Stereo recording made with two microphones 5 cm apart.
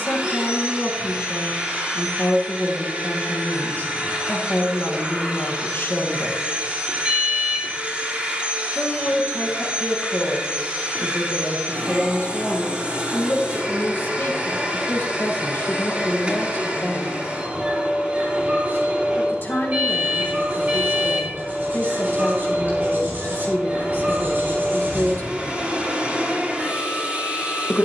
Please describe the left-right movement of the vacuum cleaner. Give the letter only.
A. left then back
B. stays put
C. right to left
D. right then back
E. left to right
B.